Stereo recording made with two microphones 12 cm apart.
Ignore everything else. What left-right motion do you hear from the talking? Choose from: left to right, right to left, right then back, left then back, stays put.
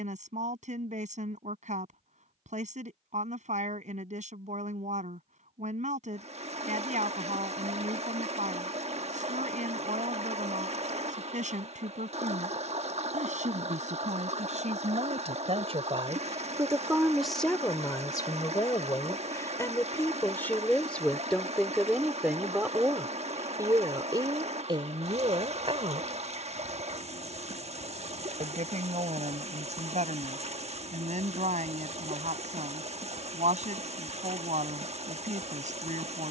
left then back.